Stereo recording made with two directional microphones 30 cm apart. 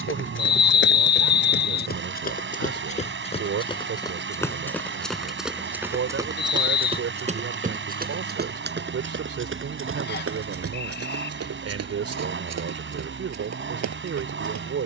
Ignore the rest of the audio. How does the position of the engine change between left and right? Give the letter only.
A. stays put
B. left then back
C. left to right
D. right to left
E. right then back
A.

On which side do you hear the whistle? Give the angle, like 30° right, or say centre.
30° left.